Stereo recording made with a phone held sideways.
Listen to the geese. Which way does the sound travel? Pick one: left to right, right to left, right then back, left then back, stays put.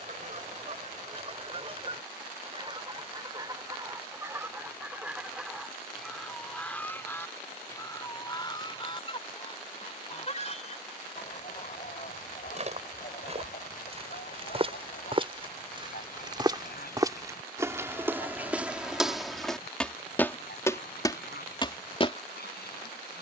right to left.